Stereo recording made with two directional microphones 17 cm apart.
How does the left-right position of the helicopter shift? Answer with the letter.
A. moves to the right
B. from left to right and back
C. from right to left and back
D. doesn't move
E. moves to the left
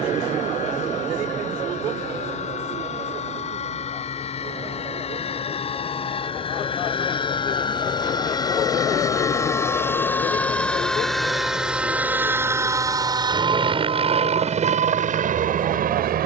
A.